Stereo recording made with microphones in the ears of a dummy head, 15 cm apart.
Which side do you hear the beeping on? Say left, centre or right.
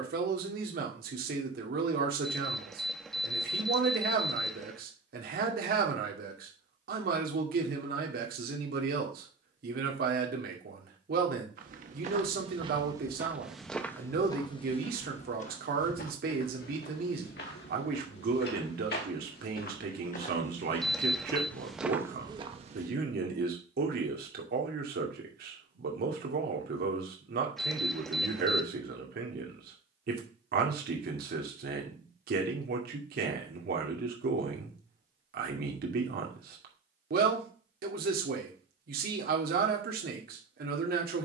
centre.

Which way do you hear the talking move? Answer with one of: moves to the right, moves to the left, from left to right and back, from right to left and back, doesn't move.
doesn't move.